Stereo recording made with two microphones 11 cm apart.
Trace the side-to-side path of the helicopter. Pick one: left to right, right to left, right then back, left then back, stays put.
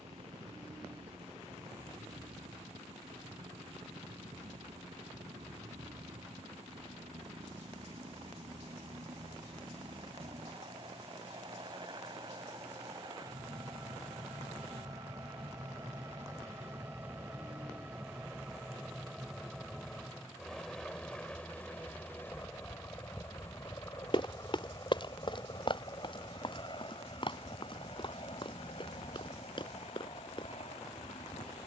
right to left.